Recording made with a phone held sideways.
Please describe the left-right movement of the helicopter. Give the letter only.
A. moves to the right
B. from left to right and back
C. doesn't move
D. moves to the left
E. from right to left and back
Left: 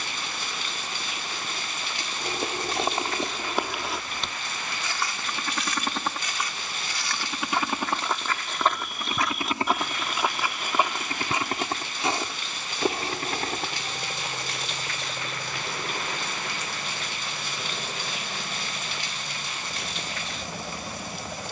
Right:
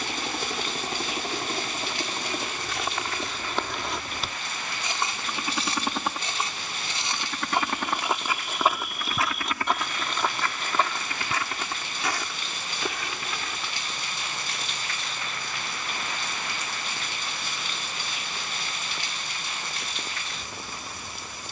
D.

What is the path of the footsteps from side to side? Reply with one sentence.
You can hear the footsteps go right and come back.